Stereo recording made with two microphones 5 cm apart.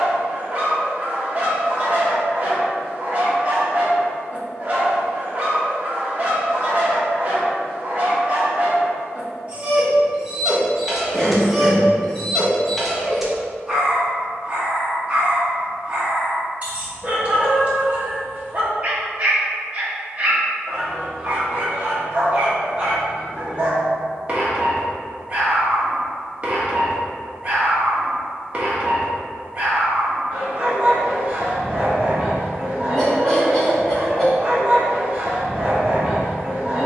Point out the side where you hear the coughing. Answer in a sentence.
You can hear the coughing in the centre.